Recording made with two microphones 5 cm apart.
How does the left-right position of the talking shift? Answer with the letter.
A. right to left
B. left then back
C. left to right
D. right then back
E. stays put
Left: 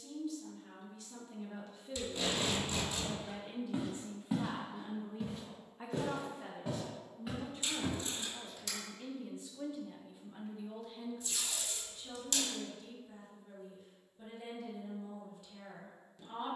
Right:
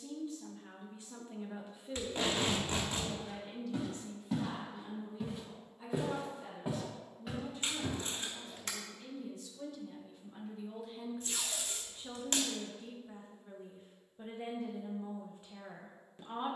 B.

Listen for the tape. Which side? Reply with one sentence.
In this clip you hear the tape on the right.